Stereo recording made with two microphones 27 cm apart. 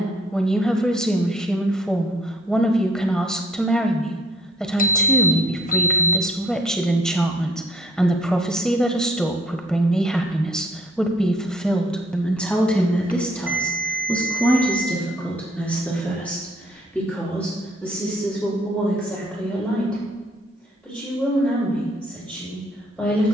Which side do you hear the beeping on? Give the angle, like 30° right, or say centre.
30° left.